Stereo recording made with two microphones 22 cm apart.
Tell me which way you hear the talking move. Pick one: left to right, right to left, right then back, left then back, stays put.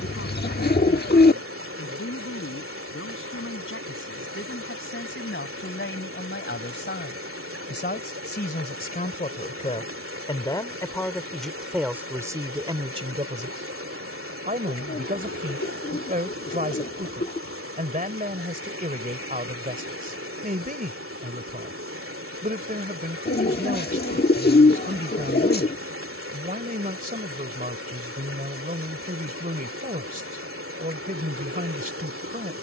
left to right.